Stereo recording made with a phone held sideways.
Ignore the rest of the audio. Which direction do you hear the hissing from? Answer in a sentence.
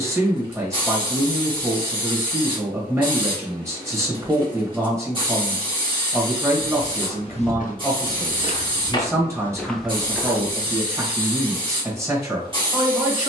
In this clip you hear the hissing on the right.